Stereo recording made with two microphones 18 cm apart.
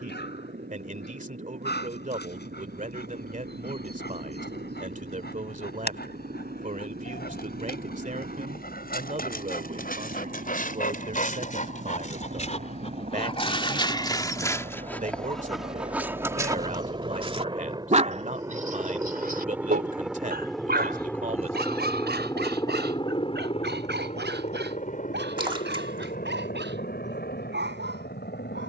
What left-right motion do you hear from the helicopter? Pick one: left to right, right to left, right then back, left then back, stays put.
right to left.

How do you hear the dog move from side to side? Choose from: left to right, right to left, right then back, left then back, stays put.
left to right.